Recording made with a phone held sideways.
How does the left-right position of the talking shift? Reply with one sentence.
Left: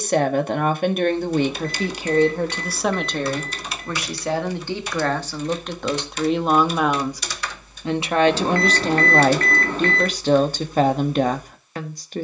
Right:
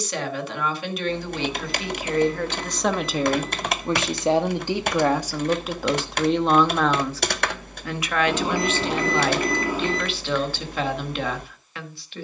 You can hear the talking go right and come back.